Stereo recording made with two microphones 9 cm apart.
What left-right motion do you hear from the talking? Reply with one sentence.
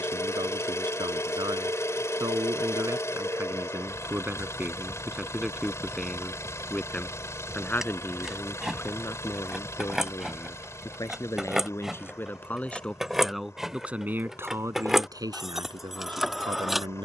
In this clip you hear the talking move from right to left and back again.